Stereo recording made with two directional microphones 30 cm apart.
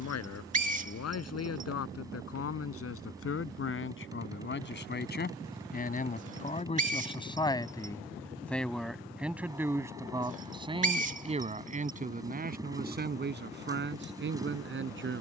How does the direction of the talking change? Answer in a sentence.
You can hear the talking move to the right.